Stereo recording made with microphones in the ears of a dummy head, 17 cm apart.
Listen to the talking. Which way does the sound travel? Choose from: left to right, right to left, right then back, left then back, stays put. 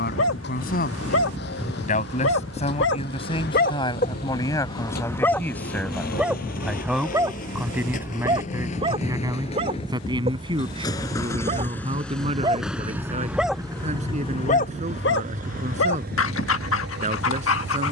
left to right.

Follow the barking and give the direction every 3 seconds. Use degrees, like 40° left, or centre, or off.
80° left, 30° left, 20° right, 30° right, 10° left, 80° left.